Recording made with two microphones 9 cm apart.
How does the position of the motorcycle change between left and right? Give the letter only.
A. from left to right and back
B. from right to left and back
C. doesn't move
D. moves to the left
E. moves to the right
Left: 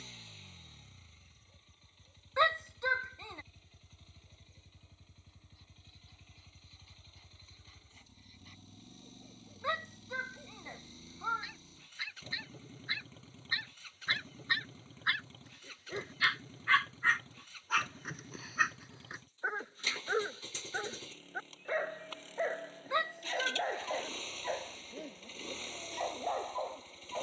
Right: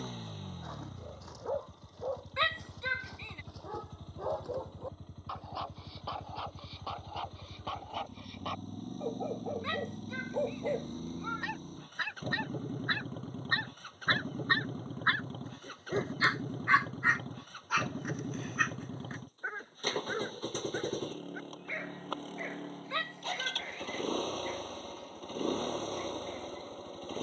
C.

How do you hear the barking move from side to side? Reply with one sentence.
In this clip you hear the barking travel towards the left.